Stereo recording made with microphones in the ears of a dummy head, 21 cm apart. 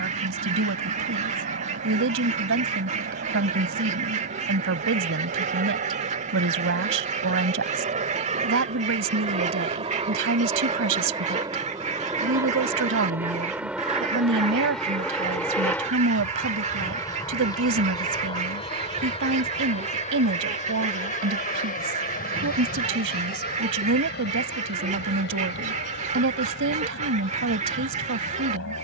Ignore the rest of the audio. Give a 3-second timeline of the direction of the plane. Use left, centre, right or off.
right, right, right, right, centre, centre, left, left, left, left.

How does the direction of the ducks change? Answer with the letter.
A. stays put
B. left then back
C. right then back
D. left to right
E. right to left
A.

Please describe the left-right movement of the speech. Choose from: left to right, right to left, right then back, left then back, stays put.
stays put.